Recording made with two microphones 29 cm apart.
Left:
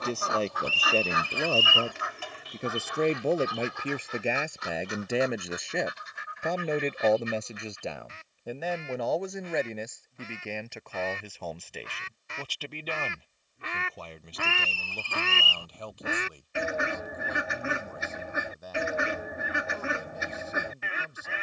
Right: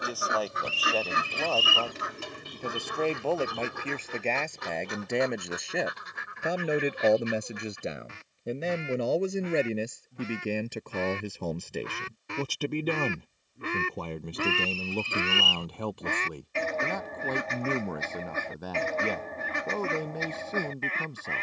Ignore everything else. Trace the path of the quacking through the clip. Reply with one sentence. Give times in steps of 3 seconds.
In this clip you hear the quacking on the right from 0 s and in the centre from 15 s.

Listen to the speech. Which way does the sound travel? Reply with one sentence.
In this clip you hear the speech travel towards the right.